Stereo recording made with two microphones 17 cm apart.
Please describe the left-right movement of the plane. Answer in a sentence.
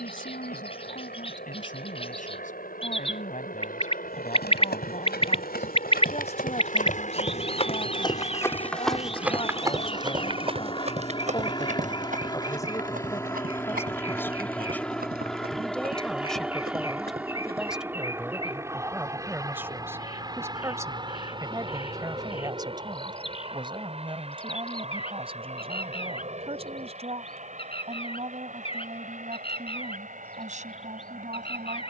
In this clip you hear the plane move from left to right.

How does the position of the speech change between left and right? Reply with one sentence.
You can hear the speech travel towards the right.